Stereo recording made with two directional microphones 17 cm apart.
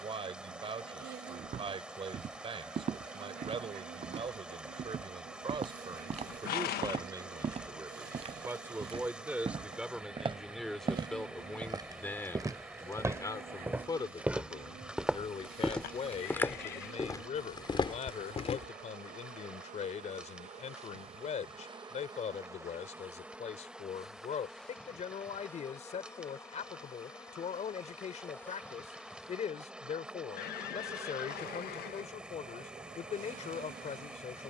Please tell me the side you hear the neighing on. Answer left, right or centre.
left.